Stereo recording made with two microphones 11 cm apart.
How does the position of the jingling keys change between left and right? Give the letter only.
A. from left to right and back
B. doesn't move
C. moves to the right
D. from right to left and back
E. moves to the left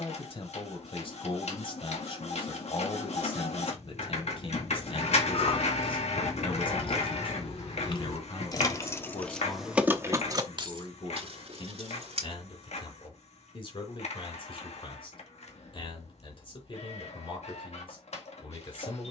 C.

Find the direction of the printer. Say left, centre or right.
left.